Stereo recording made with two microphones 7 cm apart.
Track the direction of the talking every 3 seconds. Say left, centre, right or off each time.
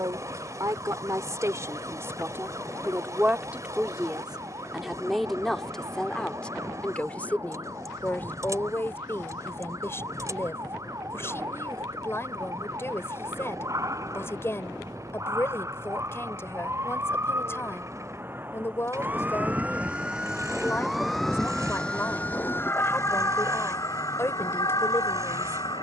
right, centre, left, left, left, left, left, left, left.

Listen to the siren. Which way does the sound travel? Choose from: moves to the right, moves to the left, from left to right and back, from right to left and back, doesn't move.
moves to the left.